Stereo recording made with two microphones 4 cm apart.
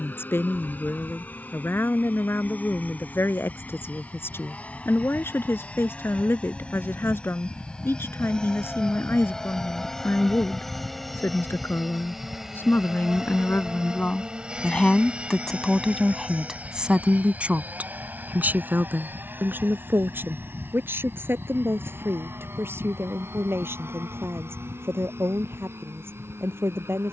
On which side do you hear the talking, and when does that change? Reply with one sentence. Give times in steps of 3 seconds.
In this clip you hear the talking on the left from 0 s, in the centre from 15 s and on the right from 18 s.